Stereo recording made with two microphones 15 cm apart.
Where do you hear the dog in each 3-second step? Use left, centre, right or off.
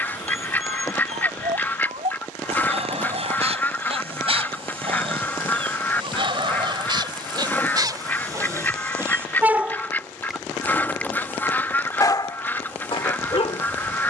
right, right, right, centre, left.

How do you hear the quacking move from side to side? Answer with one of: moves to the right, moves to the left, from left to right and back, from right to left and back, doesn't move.
doesn't move.